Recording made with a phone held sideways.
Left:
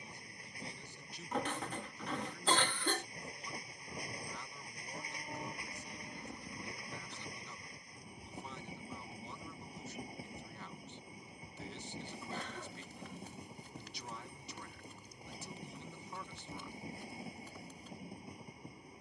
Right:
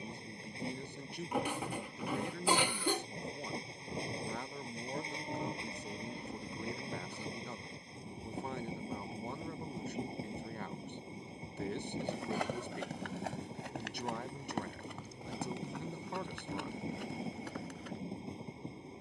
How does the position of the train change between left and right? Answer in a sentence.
You can hear the train stay put.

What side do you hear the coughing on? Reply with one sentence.
You can hear the coughing in the centre.